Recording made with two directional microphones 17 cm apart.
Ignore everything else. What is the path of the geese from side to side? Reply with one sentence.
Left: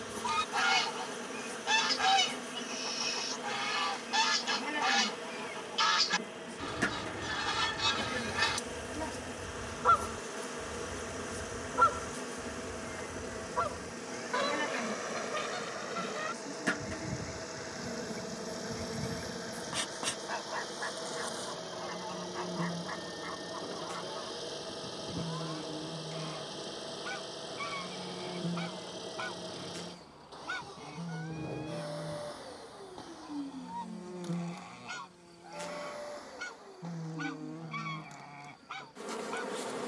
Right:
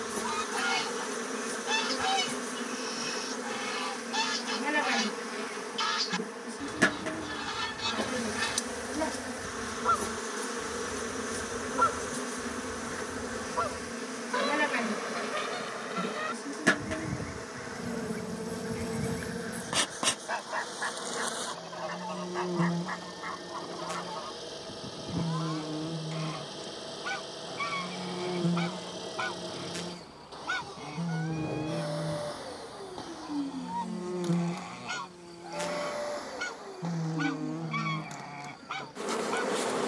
You can hear the geese travel towards the right.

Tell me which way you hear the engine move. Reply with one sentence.
You can hear the engine go from the left side to the right.